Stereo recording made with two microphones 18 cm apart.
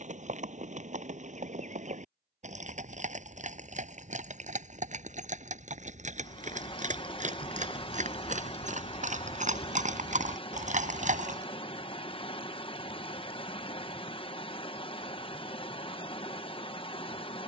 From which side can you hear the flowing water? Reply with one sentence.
In this clip you hear the flowing water on the left.